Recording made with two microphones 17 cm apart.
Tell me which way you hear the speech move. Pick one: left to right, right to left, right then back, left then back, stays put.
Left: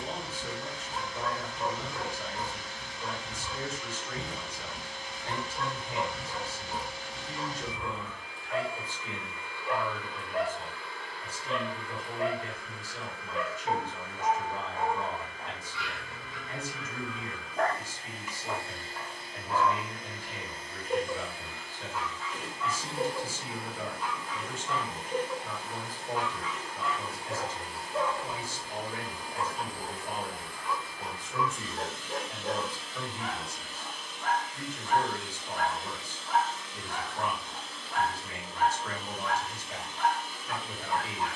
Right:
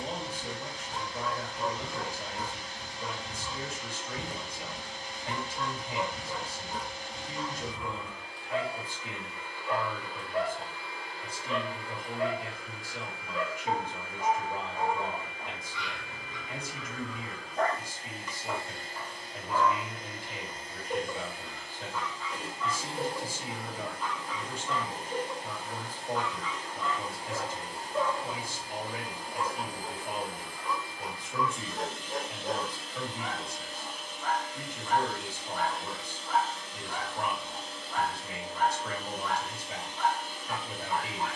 stays put.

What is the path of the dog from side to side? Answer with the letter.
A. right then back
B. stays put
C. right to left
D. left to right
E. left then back
B.